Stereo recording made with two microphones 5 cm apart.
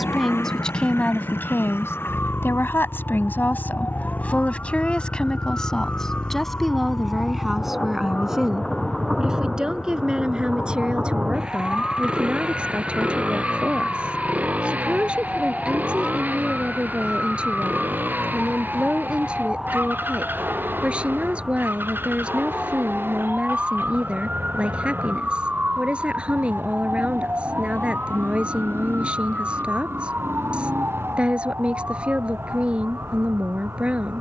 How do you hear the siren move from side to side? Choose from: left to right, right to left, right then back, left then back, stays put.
left to right.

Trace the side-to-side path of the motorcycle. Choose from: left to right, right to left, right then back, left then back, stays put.
left to right.